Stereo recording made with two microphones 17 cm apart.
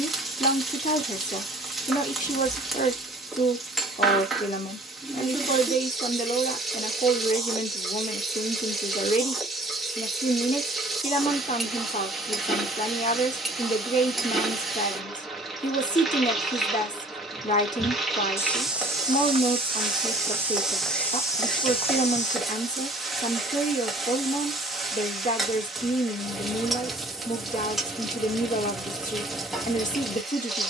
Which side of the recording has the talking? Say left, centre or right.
left.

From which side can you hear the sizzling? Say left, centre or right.
centre.